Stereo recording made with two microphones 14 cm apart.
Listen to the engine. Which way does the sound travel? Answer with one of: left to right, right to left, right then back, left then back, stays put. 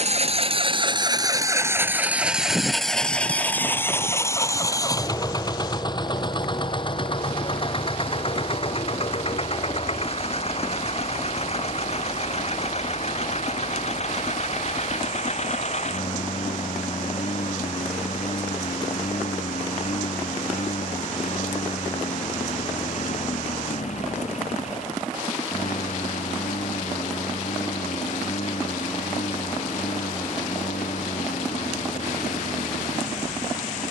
right to left.